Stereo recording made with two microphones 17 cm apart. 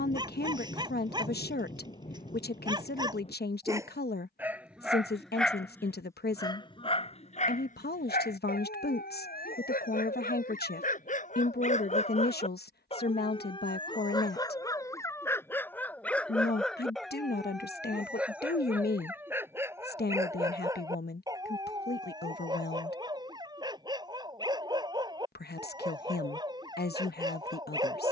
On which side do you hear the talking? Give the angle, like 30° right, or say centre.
70° left.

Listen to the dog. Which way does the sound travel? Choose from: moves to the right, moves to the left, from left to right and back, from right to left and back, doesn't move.
from right to left and back.